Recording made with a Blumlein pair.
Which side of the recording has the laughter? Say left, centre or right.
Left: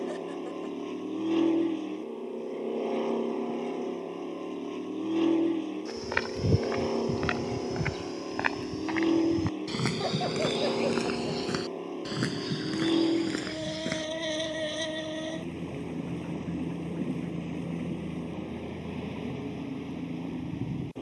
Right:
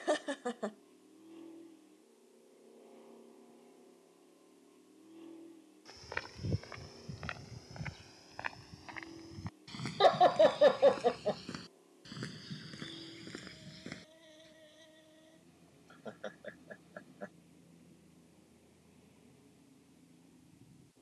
right.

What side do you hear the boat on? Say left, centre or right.
left.